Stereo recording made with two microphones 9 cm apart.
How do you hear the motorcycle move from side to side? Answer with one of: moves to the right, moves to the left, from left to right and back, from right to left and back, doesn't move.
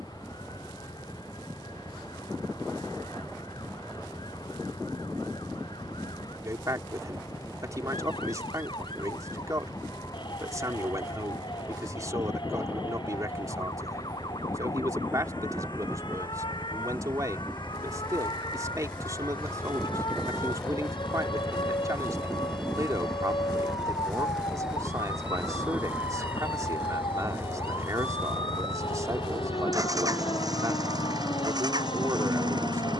moves to the right.